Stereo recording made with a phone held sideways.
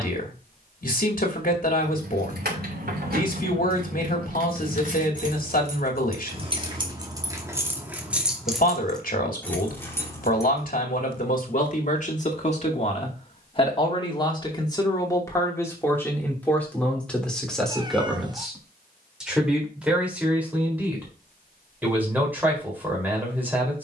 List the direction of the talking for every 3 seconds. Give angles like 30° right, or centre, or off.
60° left, 60° left, 60° left, 60° left, 30° left, 10° left, 10° right, 10° right.